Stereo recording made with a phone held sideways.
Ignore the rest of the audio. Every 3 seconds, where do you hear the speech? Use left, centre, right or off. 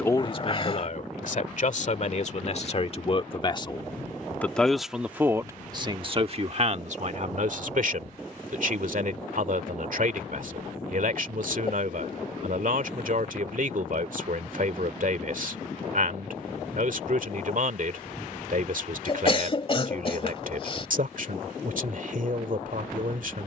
left, centre, right, right, right, right, right, right.